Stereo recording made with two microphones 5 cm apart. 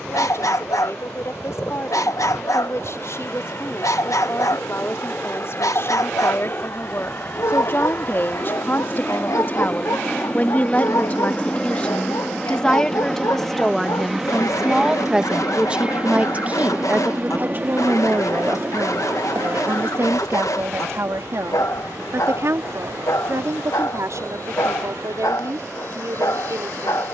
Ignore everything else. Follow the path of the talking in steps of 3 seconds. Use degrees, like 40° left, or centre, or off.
60° left, 60° left, 50° left, 30° left, 10° left, 30° right, 50° right, 60° right, 70° right.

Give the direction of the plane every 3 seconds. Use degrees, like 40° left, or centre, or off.
60° left, 50° left, 40° left, 20° left, centre, 20° right, 40° right, 50° right, 60° right.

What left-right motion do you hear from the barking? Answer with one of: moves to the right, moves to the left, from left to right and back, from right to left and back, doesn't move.
doesn't move.